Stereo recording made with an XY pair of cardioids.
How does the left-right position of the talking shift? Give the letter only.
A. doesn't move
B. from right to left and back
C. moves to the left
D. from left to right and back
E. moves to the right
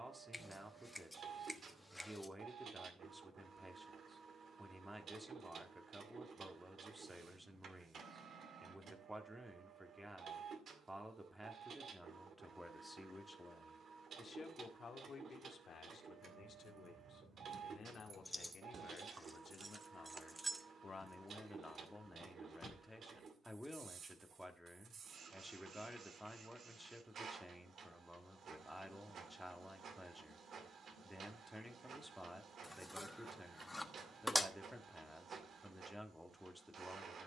B.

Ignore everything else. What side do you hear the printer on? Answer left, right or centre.
right.